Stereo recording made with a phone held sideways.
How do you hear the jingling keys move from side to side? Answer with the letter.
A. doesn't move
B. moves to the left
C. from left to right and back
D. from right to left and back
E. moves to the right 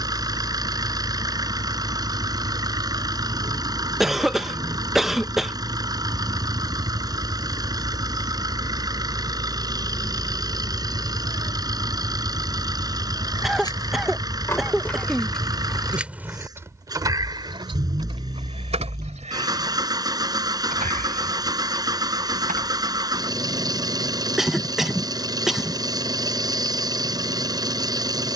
E.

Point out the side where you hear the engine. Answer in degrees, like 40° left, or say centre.
30° right.